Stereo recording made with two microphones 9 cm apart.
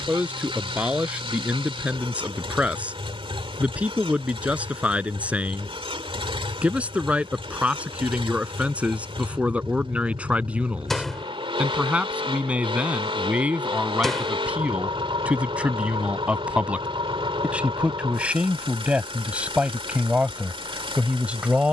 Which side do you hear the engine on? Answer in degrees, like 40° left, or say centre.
80° right.